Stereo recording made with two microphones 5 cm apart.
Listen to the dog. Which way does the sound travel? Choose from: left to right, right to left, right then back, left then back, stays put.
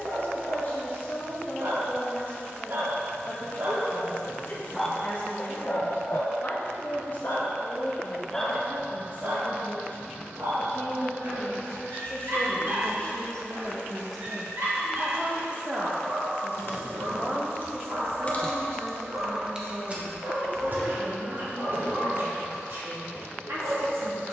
left then back.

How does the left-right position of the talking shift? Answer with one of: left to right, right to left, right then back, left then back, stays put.
left to right.